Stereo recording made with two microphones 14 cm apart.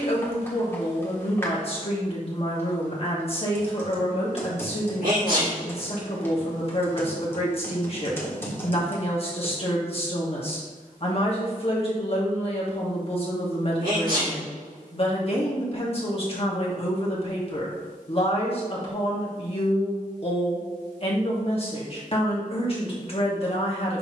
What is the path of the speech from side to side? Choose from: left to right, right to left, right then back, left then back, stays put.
stays put.